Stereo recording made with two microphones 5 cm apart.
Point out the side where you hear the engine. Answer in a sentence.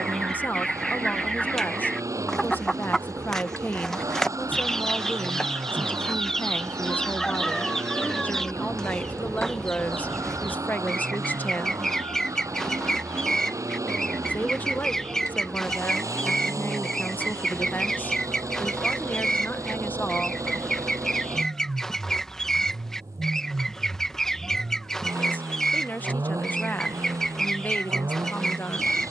You can hear the engine on the right.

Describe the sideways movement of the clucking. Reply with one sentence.
You can hear the clucking stay in one place.